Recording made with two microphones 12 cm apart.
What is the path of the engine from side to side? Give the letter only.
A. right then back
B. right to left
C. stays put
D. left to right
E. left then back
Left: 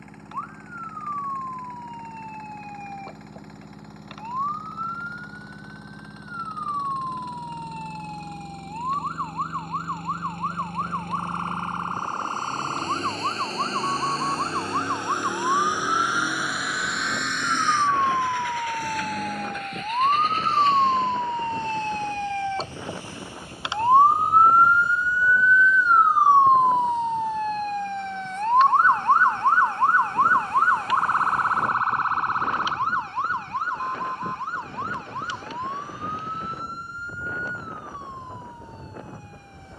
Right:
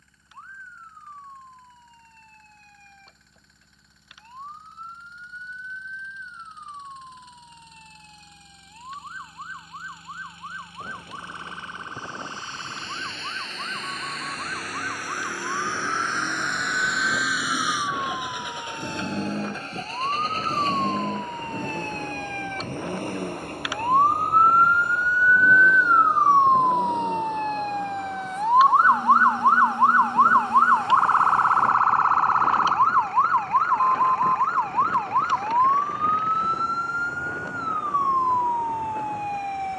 D.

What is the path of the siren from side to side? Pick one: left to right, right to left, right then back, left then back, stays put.
left to right.